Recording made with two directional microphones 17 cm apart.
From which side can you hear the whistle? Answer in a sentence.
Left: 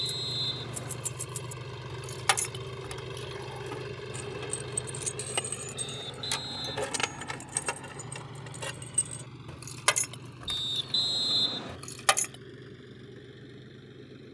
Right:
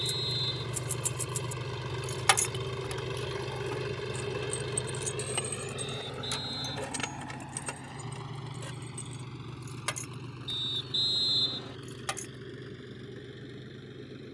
In this clip you hear the whistle on the left.